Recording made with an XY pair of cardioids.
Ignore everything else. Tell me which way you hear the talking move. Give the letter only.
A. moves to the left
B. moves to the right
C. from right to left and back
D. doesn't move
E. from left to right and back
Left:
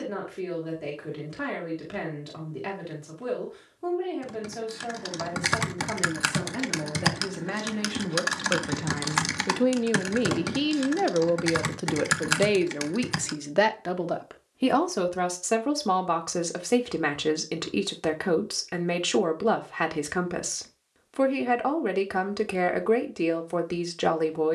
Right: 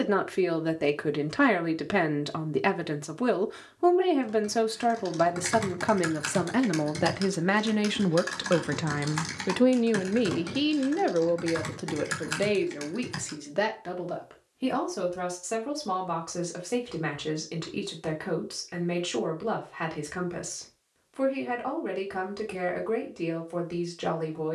A.